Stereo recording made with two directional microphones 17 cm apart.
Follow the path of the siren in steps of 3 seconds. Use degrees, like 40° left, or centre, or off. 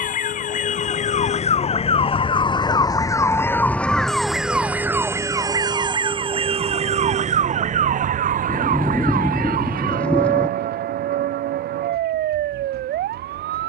40° left, centre, 40° right, 60° right, 70° right.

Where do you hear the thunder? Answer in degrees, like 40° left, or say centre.
10° left.